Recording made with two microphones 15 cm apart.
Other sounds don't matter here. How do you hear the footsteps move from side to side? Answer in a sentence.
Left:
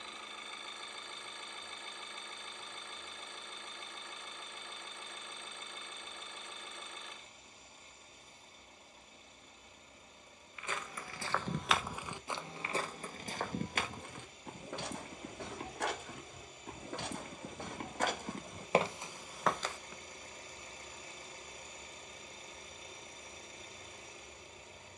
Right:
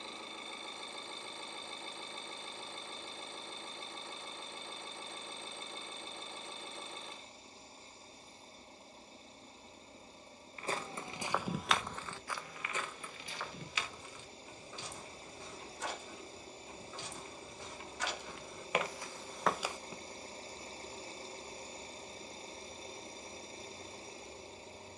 You can hear the footsteps move from right to left and back again.